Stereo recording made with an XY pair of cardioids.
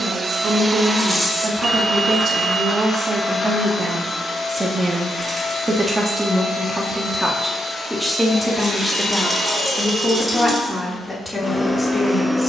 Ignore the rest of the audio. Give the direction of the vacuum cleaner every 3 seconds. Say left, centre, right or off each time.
centre, left, left, left.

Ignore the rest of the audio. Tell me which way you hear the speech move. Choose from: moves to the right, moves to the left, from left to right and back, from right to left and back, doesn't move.
moves to the left.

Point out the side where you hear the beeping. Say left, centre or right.
right.